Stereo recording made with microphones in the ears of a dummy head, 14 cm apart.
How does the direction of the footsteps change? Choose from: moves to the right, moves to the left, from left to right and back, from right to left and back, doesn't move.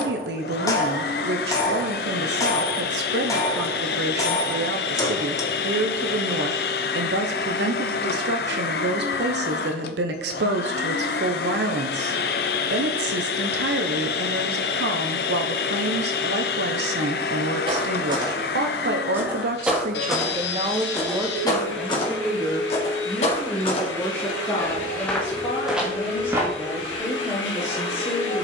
from right to left and back.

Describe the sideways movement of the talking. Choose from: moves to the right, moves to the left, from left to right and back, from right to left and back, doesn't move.
moves to the left.